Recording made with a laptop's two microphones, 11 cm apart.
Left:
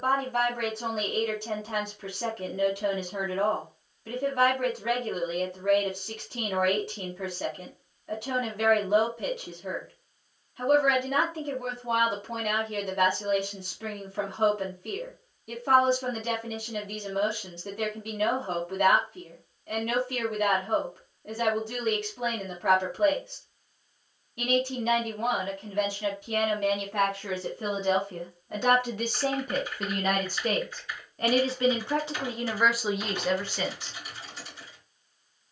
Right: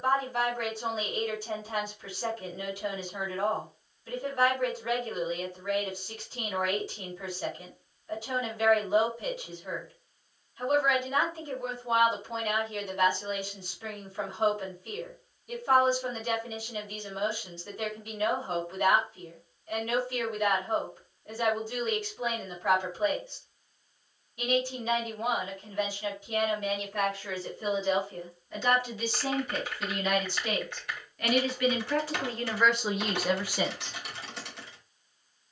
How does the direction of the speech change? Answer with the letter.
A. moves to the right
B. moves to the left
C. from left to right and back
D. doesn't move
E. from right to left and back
A.